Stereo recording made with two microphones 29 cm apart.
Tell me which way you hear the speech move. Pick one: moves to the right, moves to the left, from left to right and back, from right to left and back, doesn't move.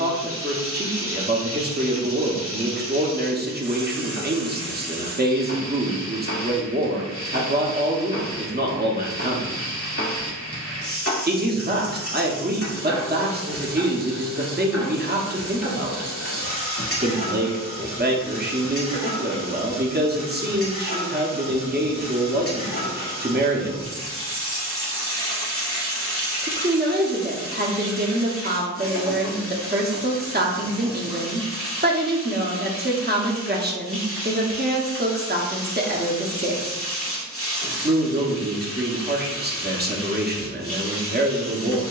doesn't move.